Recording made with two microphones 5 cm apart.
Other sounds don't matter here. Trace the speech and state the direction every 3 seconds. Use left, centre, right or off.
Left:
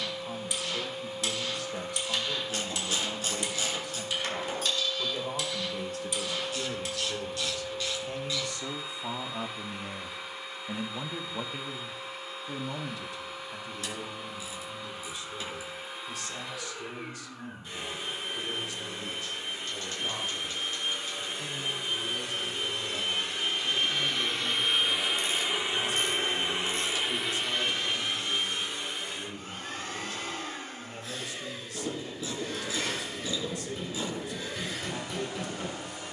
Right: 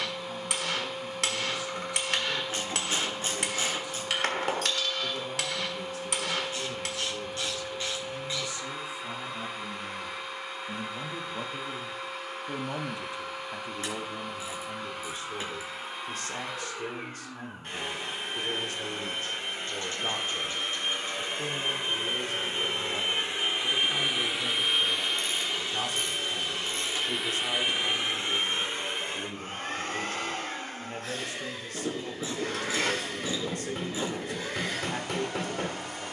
left, left, left, left, right, right, right, right, right, right, right, right.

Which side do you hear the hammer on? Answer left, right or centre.
right.